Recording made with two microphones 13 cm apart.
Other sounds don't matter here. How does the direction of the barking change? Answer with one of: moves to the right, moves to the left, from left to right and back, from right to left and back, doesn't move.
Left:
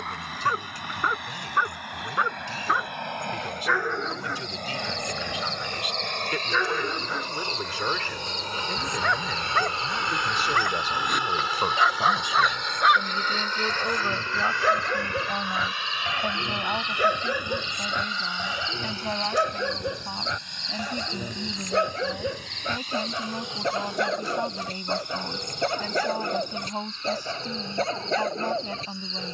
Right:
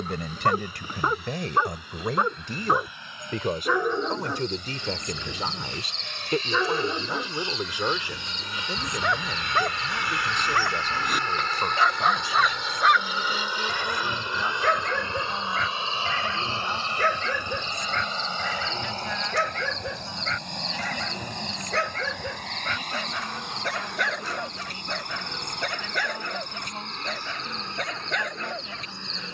moves to the left.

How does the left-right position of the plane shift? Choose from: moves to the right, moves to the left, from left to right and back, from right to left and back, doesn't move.
moves to the right.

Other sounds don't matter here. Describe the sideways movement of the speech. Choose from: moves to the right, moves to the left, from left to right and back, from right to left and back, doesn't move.
moves to the left.